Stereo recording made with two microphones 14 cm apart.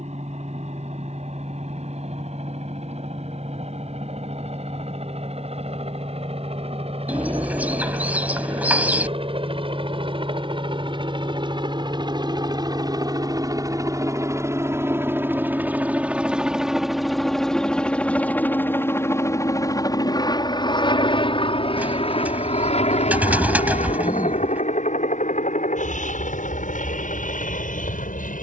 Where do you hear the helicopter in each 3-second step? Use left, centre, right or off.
right, right, right, right, right, centre, left, left, left, left.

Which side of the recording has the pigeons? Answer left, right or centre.
centre.